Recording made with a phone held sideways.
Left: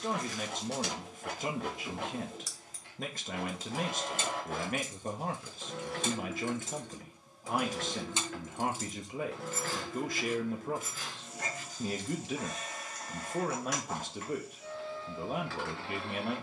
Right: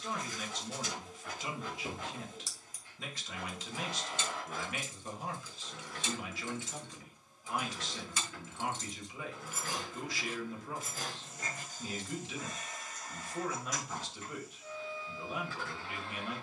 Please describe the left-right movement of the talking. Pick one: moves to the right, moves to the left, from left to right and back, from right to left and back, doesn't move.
doesn't move.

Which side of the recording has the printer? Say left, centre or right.
left.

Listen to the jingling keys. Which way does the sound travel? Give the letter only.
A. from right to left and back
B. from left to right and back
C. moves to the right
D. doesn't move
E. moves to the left
A.